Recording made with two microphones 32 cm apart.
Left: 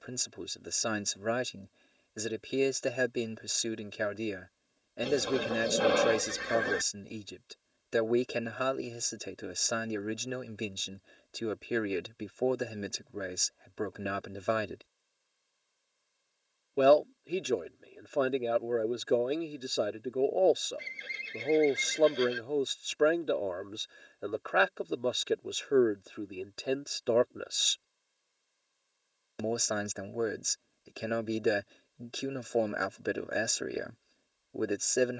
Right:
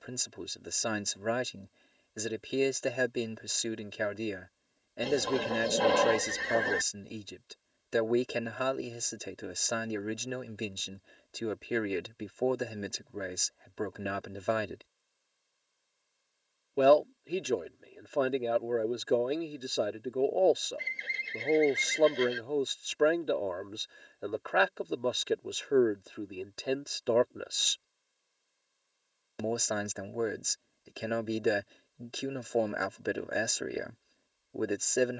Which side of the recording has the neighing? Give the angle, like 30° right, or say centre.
10° left.